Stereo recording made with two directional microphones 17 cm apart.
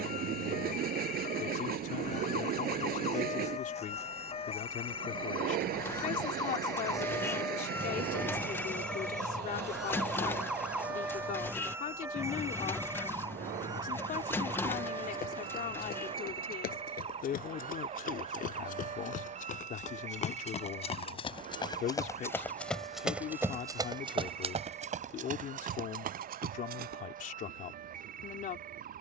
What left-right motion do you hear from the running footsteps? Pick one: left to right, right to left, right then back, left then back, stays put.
left to right.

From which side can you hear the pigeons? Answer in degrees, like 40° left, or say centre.
10° left.